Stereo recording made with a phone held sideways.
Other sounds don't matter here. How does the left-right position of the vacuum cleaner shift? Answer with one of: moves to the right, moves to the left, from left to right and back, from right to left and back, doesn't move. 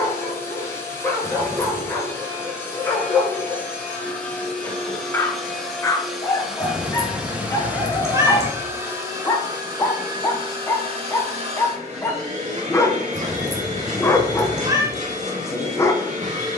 moves to the right.